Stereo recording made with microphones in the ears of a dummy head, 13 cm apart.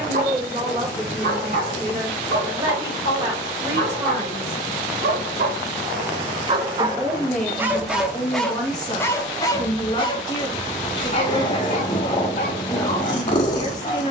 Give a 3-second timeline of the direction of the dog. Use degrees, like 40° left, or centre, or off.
60° right, 50° right, 20° right, 40° left, 60° left.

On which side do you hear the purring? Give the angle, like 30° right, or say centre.
30° left.